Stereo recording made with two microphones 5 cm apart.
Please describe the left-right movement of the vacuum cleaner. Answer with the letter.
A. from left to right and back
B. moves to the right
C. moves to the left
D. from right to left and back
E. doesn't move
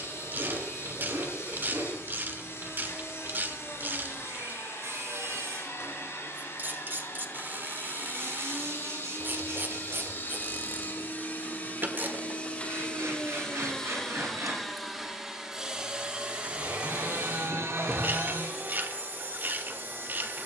B.